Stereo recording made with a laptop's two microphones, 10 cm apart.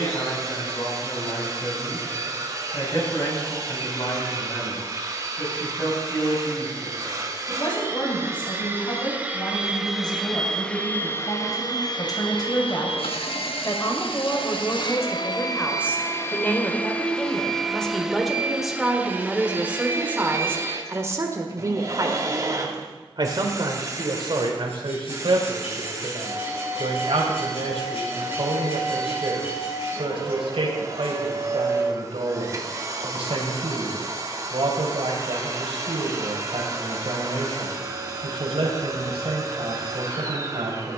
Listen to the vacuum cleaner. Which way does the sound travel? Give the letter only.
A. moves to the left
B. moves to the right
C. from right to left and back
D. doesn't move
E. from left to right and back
C.